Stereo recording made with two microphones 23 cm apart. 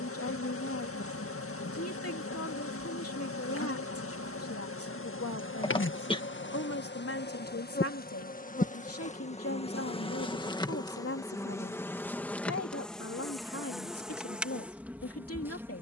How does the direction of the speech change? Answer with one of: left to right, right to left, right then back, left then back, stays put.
stays put.